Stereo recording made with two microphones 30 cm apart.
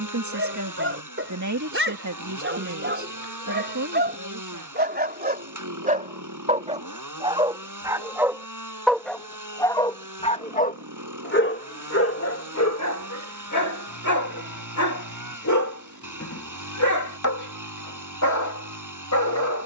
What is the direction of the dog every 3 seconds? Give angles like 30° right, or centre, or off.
40° right, 30° right, 10° right, 30° left, 60° left, 70° left, 70° left.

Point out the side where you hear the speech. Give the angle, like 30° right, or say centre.
60° right.